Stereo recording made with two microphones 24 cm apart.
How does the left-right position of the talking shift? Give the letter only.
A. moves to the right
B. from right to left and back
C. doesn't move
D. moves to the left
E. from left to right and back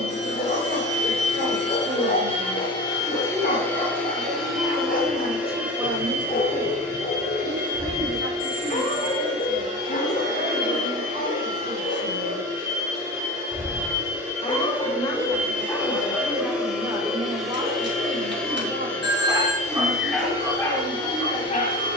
B.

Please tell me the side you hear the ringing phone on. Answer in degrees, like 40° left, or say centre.
50° right.